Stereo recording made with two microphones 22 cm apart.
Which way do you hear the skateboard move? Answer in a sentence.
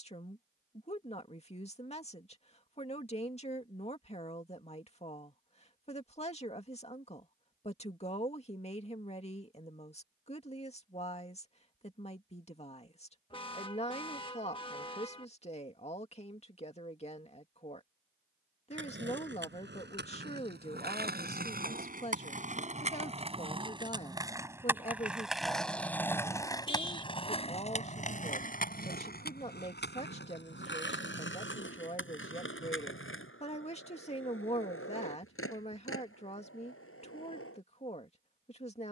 You can hear the skateboard move to the left.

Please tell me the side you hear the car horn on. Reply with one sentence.
You can hear the car horn on the left.